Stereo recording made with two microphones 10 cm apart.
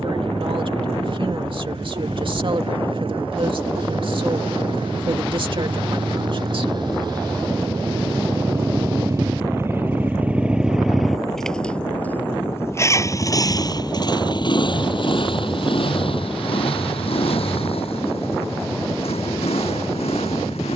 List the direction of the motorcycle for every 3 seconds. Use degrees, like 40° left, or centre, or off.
60° right, 60° right, 40° right, 10° right, 40° left, 60° left, 70° left.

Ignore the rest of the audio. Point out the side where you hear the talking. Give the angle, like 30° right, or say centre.
60° right.